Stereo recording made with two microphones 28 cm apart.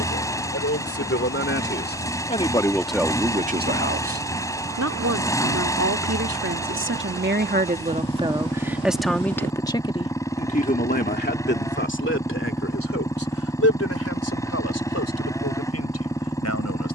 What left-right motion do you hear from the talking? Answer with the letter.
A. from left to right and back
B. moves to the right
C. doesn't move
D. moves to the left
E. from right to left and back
A.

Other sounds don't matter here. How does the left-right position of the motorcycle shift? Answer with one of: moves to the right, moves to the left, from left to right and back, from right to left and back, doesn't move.
doesn't move.